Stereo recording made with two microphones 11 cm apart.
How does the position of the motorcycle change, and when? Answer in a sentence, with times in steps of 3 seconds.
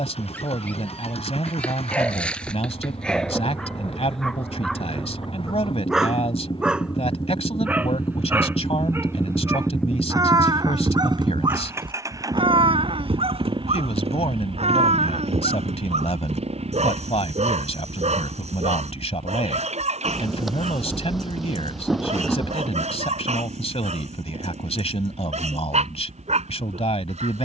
You can hear the motorcycle on the left from 0 s, in the centre from 9 s and on the right from 12 s.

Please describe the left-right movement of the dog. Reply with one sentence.
You can hear the dog go from the left side to the right.